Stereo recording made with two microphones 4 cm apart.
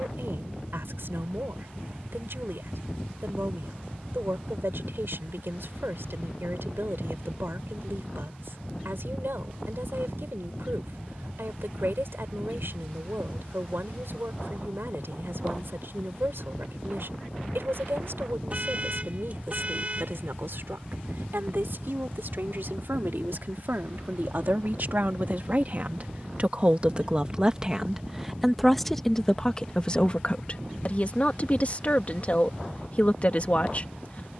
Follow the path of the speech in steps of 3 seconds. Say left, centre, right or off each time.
right, right, right, right, right, right, right, right, right, centre, left, left.